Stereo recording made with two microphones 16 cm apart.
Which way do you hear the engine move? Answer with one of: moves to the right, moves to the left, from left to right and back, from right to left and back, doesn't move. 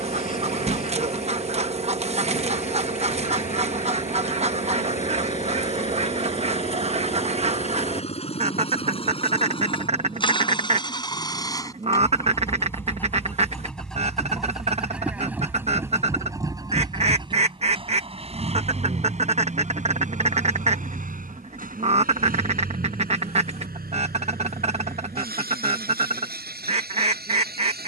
moves to the right.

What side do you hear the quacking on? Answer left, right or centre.
right.